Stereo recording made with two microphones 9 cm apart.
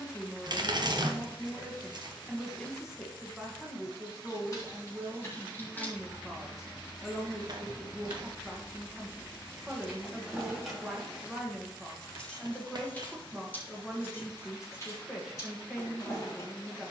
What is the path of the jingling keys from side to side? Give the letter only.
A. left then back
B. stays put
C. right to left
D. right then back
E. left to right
D.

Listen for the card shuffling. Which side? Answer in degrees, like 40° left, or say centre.
50° right.